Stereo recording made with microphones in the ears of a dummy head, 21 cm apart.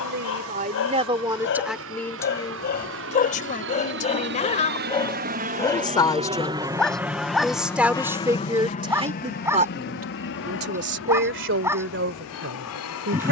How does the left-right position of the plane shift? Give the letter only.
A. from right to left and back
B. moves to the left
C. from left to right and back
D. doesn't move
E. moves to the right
B.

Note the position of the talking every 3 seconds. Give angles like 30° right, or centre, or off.
20° right, 30° left, centre, 40° right, 60° right.